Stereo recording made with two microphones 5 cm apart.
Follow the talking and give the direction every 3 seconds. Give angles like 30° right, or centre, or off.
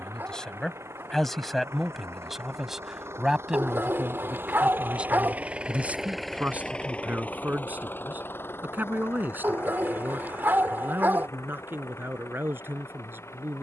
centre, 20° right, 40° right, 50° right, 50° right.